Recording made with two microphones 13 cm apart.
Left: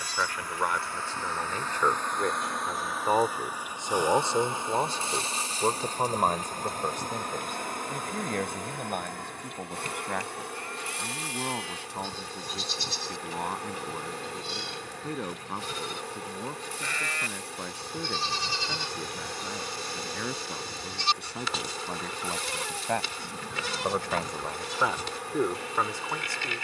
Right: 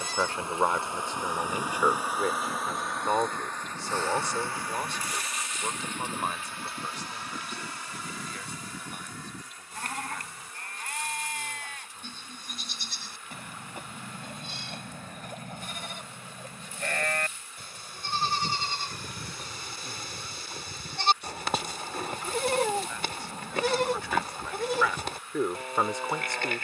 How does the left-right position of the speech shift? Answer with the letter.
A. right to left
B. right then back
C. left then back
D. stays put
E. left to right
C.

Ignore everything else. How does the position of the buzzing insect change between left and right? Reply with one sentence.
In this clip you hear the buzzing insect travel towards the left.